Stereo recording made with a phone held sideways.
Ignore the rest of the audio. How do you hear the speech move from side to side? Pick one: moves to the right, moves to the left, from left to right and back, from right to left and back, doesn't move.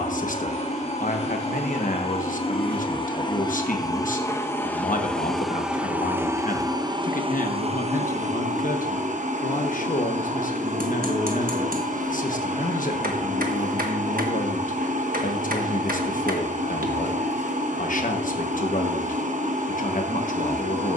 doesn't move.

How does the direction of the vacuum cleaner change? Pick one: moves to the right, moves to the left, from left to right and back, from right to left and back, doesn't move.
moves to the right.